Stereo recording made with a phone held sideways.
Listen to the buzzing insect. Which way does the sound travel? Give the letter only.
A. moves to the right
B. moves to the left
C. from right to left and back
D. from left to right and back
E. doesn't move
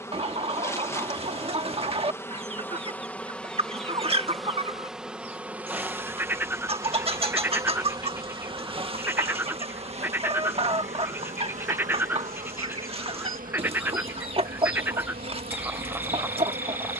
A.